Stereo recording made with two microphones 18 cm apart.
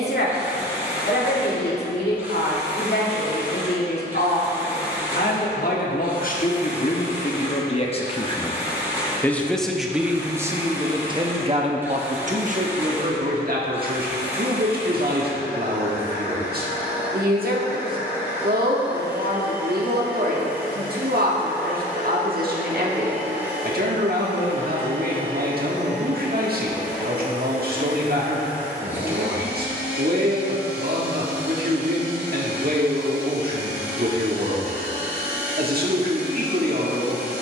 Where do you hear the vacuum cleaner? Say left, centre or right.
centre.